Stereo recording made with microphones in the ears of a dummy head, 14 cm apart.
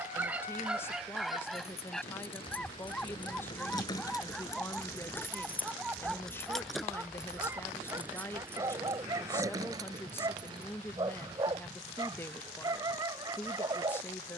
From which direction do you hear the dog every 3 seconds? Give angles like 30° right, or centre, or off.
centre, centre, 10° right, 20° right, 20° right.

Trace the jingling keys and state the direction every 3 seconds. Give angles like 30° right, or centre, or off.
40° left, 20° left, 10° right, 30° right, off.